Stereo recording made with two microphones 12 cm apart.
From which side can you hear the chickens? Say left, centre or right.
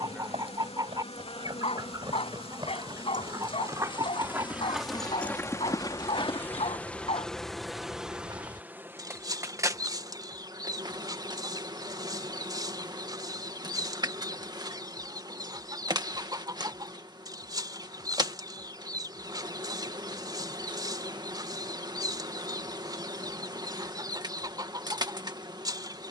right.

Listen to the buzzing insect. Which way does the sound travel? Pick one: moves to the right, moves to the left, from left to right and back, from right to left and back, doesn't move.
moves to the right.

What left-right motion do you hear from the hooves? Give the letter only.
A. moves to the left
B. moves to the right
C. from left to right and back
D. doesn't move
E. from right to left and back
A.